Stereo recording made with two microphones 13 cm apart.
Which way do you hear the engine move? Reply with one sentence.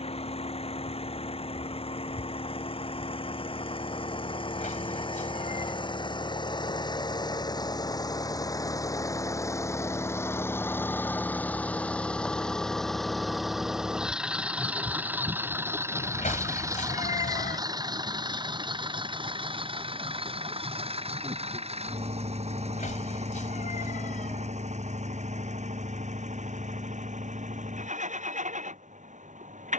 You can hear the engine move from left to right.